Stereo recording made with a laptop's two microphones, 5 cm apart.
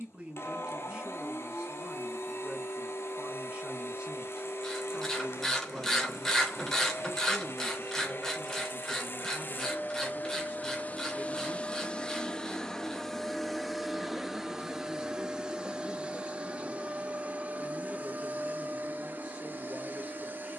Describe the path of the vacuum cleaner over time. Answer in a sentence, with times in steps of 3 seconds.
In this clip you hear the vacuum cleaner on the left from 0 s, in the centre from 12 s and on the right from 15 s.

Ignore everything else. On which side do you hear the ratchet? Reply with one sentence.
You can hear the ratchet in the centre.